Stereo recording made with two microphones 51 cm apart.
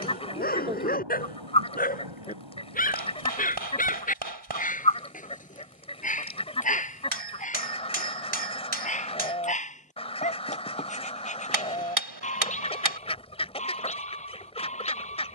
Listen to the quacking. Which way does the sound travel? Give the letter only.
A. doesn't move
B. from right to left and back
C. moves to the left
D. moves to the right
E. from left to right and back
A.